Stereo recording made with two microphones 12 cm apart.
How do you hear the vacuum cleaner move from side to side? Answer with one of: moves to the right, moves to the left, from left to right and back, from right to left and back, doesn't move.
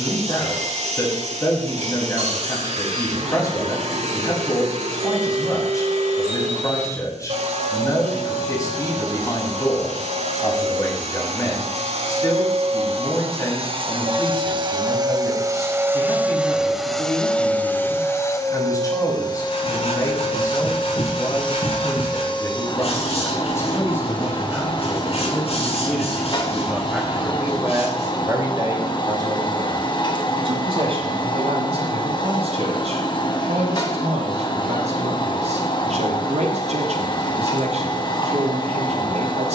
moves to the left.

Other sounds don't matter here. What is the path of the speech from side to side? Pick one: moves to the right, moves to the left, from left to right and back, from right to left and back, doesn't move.
moves to the right.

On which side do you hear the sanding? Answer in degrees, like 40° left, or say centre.
60° left.